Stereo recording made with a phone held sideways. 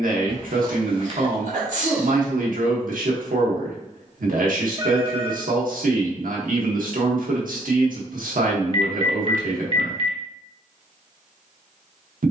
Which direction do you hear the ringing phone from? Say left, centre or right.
right.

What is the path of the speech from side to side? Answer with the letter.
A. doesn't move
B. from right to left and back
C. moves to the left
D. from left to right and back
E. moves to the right
A.